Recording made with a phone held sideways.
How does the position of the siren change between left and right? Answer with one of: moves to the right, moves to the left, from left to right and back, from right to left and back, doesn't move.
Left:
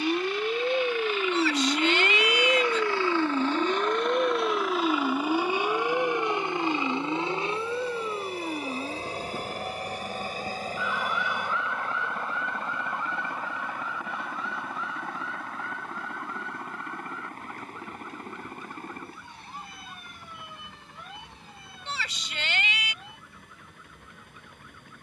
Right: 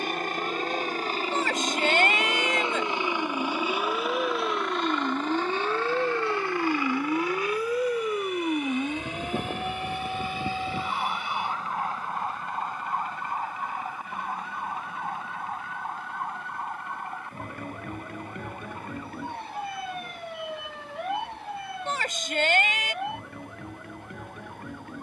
moves to the right.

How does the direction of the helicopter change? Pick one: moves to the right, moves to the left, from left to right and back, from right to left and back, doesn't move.
moves to the left.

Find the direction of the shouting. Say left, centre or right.
right.